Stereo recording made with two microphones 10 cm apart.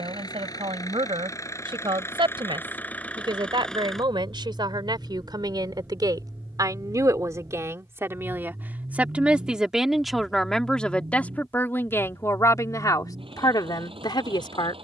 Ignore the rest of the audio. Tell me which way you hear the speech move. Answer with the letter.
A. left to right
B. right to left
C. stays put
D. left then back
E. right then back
B.